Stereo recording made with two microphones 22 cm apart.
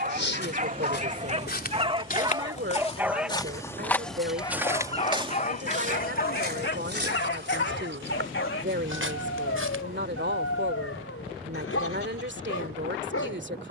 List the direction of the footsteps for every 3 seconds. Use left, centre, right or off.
left, centre, right, right, off.